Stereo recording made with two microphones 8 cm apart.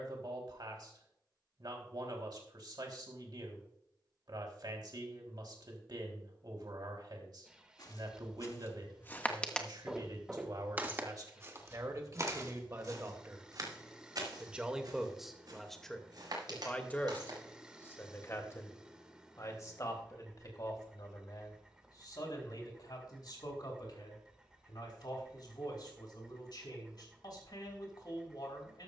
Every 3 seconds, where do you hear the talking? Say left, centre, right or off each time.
right, right, right, right, right, centre, left, left, left, left.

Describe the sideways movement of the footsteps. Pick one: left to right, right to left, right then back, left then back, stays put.
left to right.